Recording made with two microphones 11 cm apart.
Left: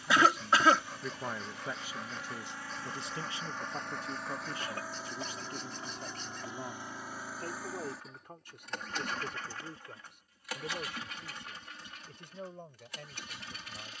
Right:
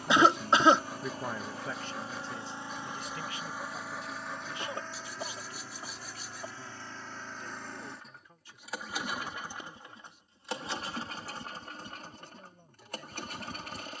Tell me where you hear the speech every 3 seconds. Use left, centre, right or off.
centre, left, left, left, left.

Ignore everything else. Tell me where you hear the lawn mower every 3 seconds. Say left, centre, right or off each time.
right, centre, centre, right, right.